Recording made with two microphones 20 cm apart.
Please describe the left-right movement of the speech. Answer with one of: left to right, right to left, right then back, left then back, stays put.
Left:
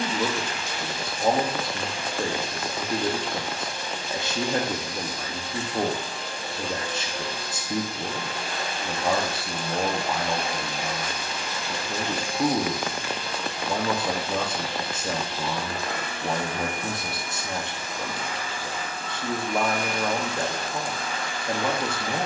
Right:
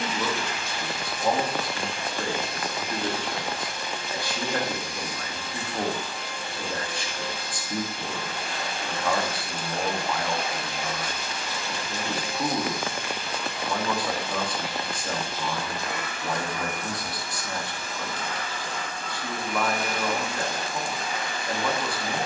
stays put.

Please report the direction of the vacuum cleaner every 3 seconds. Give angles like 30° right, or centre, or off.
40° left, 40° left, 40° left, 40° left, 40° left, 30° left, centre, 20° right.